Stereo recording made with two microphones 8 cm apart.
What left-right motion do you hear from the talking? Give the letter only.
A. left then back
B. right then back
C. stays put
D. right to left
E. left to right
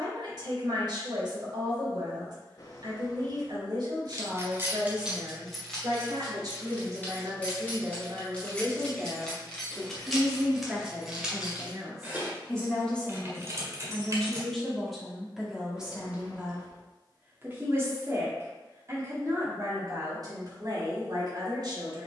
A.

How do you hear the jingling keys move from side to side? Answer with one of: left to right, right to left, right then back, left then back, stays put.
left then back.